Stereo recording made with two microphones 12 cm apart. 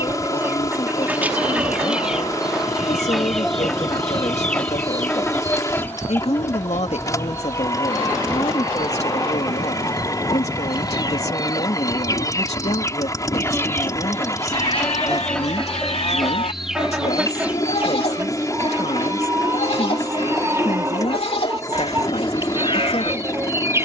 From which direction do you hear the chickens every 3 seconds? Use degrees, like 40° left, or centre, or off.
10° right, 10° left, 20° left, 30° left, 20° left, centre, 20° right, 20° right.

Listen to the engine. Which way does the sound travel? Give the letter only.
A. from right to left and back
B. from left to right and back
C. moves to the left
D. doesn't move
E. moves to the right
D.